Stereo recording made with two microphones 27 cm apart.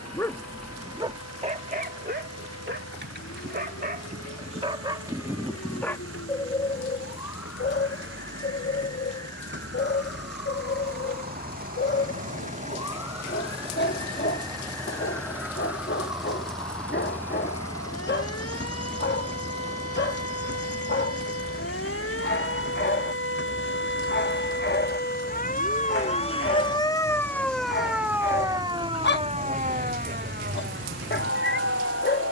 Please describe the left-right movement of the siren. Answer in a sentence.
You can hear the siren go from the left side to the right.